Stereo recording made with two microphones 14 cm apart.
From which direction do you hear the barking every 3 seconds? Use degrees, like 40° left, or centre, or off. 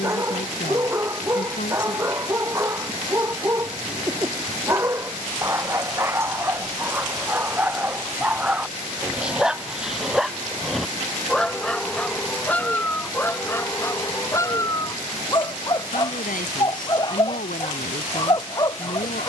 20° right, 20° right, 10° right, centre, 20° left, 30° left, 30° left.